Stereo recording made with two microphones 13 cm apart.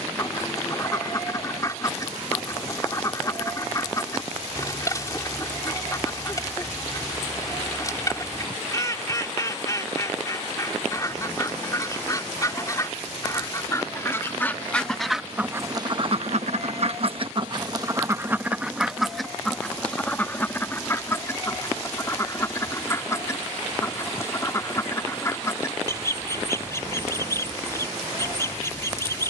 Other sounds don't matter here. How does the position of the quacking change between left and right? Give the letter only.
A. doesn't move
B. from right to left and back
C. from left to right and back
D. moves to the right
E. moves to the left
C.